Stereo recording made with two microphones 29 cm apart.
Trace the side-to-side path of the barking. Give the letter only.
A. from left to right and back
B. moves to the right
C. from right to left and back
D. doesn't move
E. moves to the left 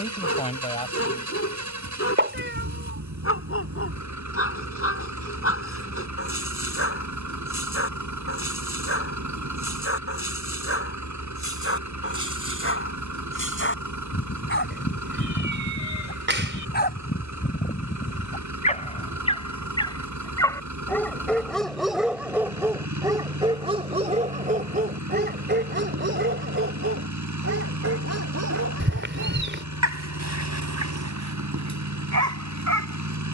B.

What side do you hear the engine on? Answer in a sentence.
In this clip you hear the engine on the right.